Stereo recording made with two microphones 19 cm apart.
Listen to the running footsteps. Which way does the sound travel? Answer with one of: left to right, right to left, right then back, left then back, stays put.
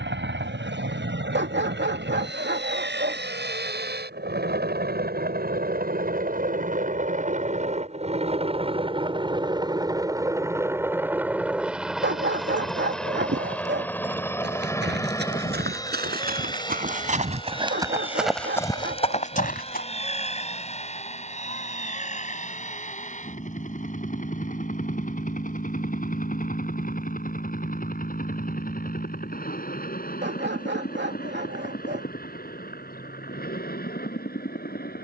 right to left.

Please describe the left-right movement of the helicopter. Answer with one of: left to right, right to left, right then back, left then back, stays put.
right to left.